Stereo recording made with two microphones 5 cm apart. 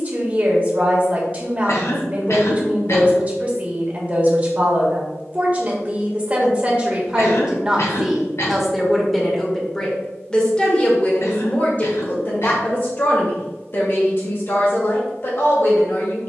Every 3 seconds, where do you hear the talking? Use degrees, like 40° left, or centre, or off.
30° right, 30° right, 10° right, 20° left, 50° left, 50° left.